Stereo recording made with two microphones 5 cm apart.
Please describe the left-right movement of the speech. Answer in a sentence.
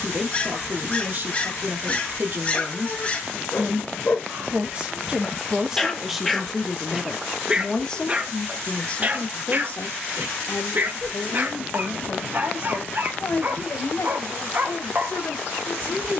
In this clip you hear the speech move from right to left.